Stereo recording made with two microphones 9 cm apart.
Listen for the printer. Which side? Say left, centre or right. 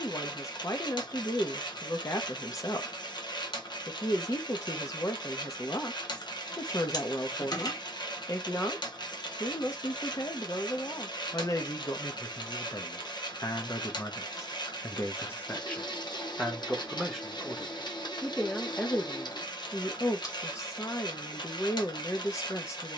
left.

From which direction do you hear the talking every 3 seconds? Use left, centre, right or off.
left, left, left, left, left, centre, left, left.